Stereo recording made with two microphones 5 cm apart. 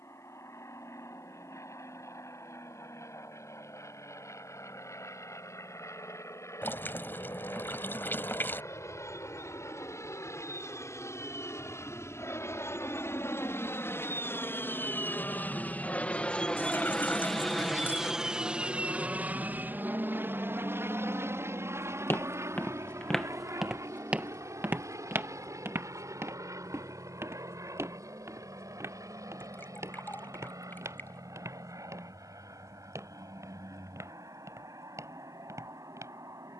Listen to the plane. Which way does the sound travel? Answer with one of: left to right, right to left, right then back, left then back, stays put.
left to right.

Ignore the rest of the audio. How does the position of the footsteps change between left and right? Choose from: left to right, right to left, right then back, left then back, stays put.
left to right.